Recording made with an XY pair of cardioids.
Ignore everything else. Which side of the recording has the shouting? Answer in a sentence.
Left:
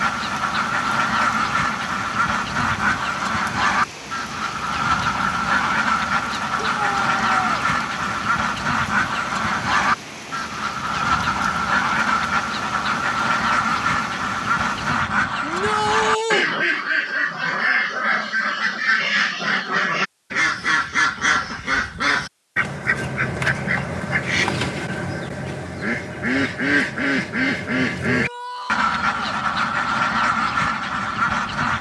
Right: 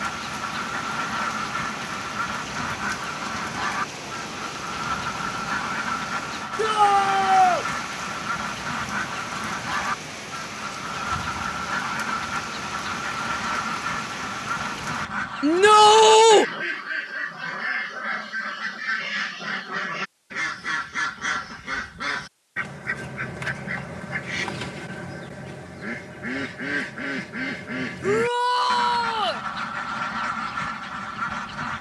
You can hear the shouting on the right.